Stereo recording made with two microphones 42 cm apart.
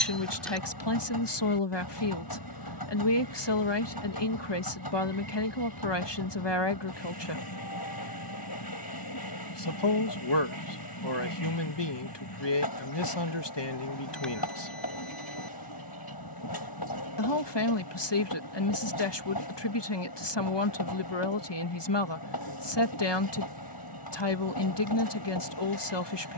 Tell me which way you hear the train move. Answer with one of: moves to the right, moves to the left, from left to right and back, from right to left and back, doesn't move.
doesn't move.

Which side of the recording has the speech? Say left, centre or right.
left.